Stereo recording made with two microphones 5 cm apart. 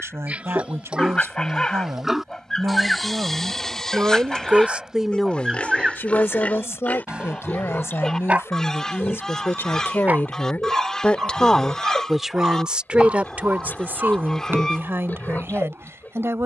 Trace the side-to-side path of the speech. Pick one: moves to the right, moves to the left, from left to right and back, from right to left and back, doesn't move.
from right to left and back.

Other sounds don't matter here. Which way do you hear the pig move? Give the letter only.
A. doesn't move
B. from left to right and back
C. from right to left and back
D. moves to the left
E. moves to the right
D.